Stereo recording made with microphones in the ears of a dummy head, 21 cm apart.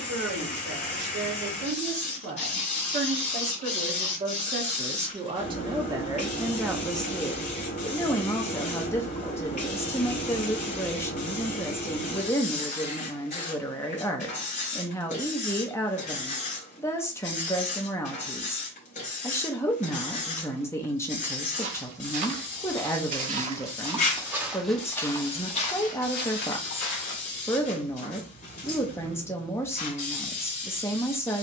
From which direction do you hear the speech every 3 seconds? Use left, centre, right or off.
right, right, centre, centre, centre, centre, centre, centre, centre, centre, centre.